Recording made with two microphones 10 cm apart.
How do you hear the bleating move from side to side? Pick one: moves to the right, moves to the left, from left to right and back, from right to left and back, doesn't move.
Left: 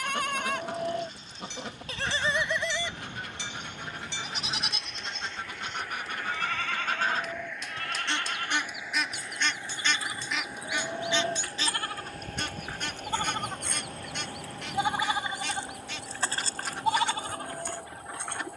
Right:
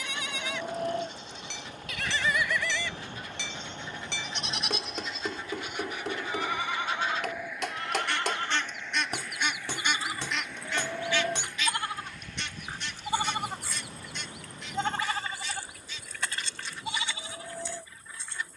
from left to right and back.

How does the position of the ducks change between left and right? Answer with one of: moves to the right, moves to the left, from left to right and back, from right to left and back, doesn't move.
from left to right and back.